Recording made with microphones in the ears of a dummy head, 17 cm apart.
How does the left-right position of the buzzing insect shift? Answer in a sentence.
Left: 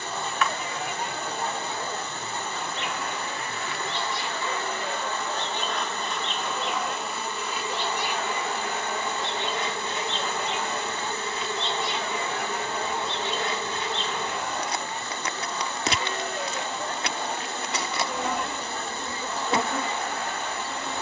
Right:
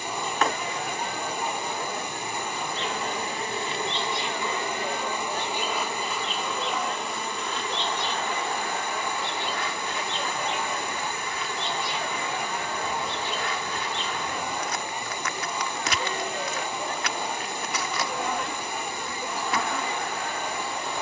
In this clip you hear the buzzing insect move from right to left.